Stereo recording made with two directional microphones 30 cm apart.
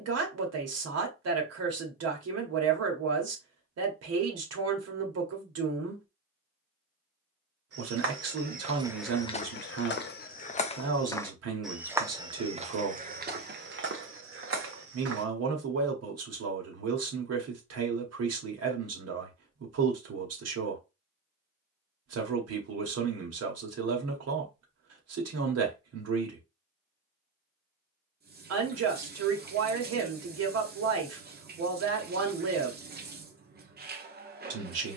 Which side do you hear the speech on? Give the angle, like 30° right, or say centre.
50° right.